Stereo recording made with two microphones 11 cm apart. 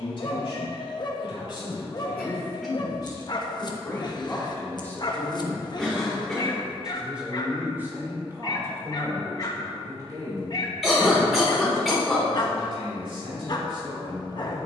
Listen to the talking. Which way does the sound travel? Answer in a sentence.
In this clip you hear the talking move from left to right.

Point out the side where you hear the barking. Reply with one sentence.
In this clip you hear the barking on the left.